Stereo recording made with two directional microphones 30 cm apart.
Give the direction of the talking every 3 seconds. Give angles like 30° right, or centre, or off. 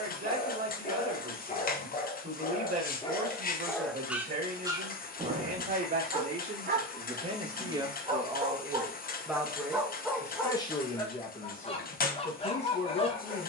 30° right, 30° right, 20° right, 10° left, 40° left.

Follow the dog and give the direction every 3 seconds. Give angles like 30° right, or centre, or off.
20° left, 10° right, 20° right, 10° left, 20° left.